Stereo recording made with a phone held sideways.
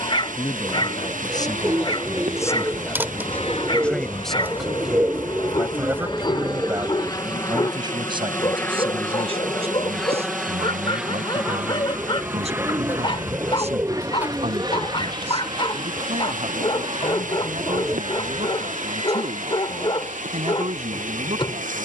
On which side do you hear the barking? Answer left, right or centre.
left.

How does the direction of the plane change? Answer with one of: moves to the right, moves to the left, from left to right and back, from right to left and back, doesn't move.
moves to the right.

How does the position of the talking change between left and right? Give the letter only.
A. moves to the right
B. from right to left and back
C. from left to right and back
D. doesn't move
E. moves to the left
A.